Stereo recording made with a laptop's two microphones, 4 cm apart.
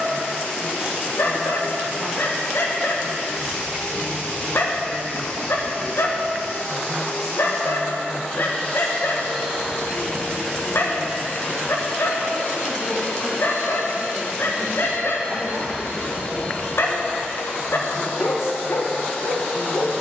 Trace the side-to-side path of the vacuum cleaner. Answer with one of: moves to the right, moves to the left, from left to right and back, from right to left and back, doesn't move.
doesn't move.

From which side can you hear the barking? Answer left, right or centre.
left.